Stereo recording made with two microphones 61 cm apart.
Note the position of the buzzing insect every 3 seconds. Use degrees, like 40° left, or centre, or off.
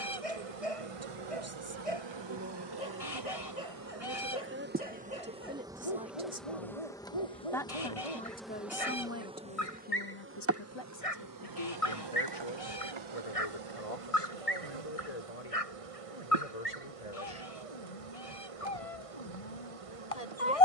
50° right, 20° right, centre, 20° right, 50° right, 60° right, 60° right.